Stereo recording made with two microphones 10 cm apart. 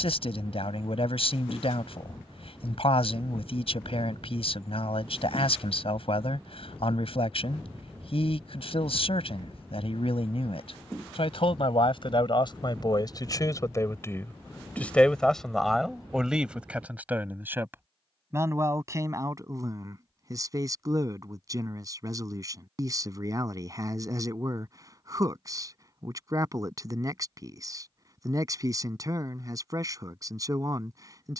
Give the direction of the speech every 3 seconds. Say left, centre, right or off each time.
left, left, left, left, left, centre, right, right, right, right, right.